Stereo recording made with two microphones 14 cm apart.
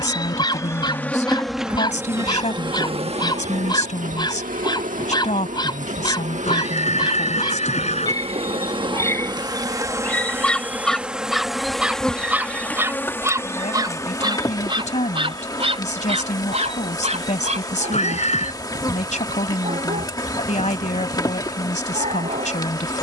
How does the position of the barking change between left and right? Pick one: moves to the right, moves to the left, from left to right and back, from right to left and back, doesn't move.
moves to the right.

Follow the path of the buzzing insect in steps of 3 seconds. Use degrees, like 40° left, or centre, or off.
centre, 60° right, 50° right, 10° right, 20° left, 30° left, 30° left, 30° left.